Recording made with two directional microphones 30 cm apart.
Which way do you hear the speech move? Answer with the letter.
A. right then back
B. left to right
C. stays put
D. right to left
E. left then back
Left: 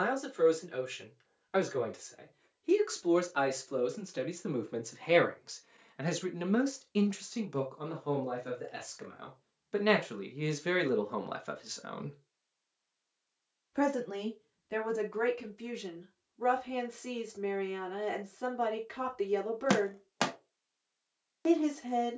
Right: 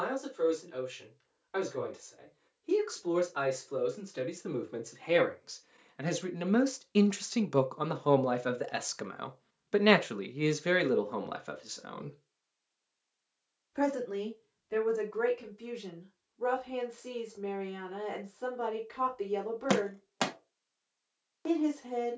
A.